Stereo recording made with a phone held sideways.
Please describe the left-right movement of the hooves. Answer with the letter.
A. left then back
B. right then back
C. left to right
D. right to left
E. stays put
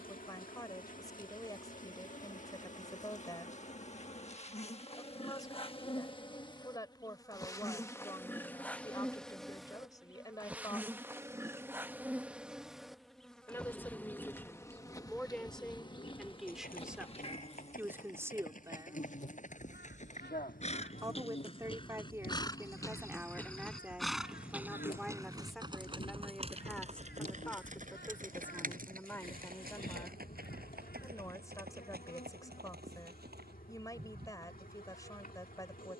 C.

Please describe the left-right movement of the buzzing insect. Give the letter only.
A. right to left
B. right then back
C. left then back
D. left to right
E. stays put
B.